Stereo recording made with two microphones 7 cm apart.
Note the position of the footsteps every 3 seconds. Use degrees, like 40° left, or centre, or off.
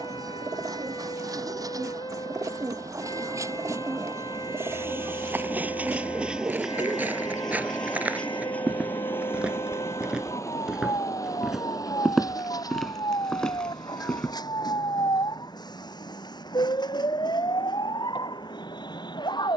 off, 30° right, 20° right, 10° right, 10° left, off, off.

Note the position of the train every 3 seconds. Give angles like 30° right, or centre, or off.
50° right, 30° right, 10° left, 40° left, 60° left, 70° left, 70° left.